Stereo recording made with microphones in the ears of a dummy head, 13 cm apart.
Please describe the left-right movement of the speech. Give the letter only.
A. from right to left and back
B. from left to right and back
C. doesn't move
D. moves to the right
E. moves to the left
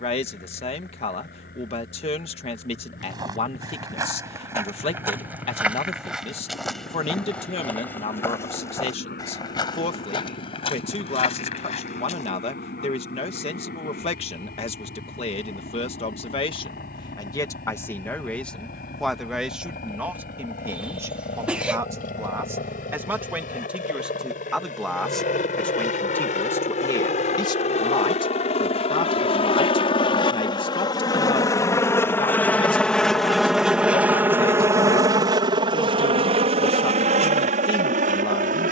B.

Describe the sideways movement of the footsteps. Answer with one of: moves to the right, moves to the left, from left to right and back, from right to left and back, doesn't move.
moves to the left.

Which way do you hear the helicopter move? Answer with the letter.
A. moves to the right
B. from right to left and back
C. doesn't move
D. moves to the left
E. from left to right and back
A.